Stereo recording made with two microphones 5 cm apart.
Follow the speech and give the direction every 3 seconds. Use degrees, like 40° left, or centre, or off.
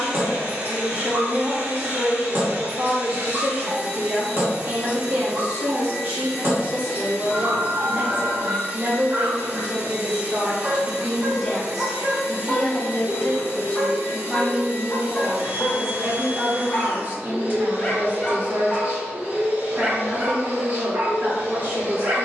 50° right, 50° right, 50° right, 20° right, 10° left, 30° right, 40° right, 40° right.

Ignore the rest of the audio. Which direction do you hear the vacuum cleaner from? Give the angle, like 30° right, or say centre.
30° right.